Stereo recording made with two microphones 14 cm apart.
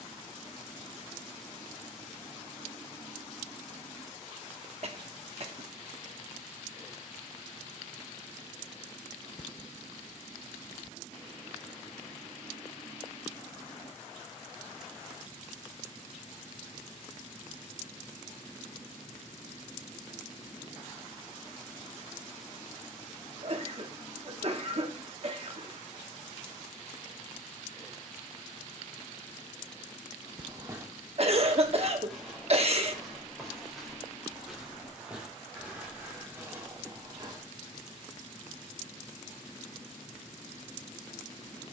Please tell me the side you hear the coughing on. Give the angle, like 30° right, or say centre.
50° right.